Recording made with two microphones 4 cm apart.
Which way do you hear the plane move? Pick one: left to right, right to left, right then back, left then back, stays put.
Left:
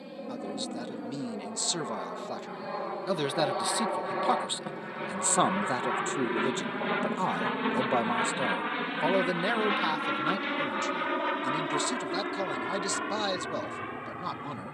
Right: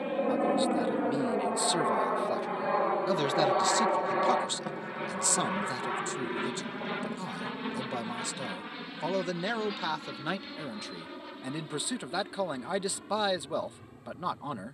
right to left.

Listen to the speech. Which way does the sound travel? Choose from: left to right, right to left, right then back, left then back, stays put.
left then back.